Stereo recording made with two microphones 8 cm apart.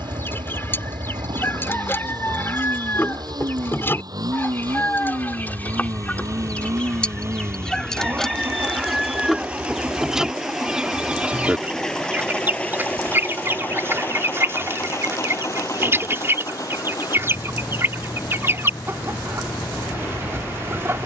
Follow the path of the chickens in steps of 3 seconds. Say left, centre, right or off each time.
left, left, centre, centre, right, right, right.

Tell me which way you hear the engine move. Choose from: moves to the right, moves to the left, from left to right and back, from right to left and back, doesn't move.
moves to the left.